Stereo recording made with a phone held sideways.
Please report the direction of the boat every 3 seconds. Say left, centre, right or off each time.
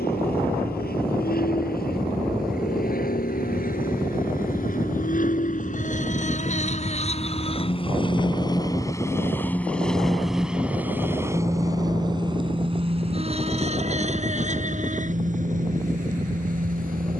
left, left, left, centre, right, right.